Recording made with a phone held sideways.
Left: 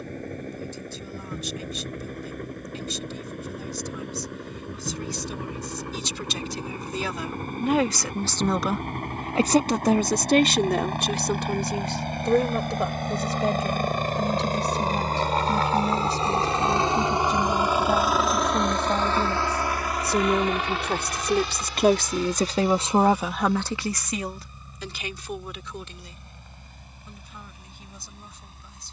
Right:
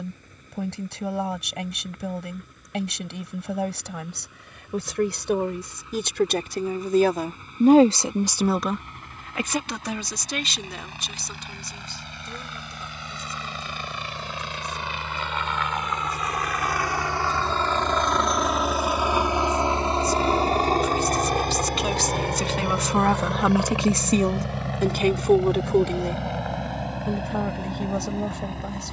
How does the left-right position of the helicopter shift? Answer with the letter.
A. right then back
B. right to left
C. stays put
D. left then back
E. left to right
E.